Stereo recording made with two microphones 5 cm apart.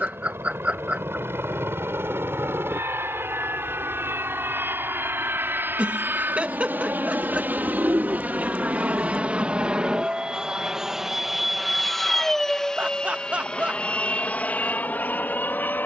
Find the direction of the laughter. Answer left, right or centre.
right.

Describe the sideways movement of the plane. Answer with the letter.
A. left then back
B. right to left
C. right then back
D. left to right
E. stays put
B.